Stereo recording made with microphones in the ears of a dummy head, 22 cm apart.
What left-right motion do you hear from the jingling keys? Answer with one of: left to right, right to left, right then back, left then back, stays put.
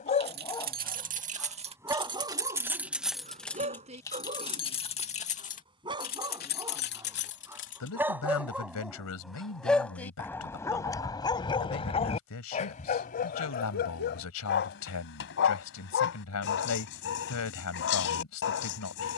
right to left.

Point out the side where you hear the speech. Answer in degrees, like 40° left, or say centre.
70° left.